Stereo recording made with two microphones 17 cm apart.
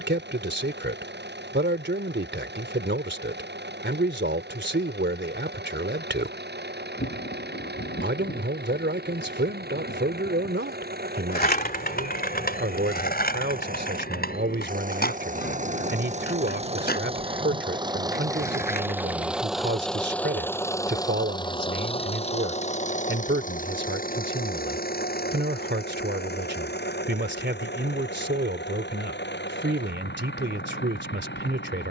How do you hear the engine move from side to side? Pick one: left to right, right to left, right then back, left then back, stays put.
right to left.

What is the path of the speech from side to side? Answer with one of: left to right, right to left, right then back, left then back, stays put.
stays put.